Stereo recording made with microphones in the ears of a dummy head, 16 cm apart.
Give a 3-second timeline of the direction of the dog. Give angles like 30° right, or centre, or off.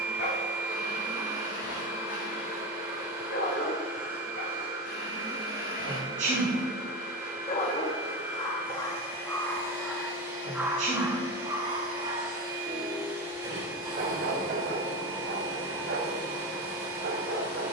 70° left, 60° left, 30° left, 10° right, 40° right, 60° right.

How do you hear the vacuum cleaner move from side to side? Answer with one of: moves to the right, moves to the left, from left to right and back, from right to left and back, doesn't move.
doesn't move.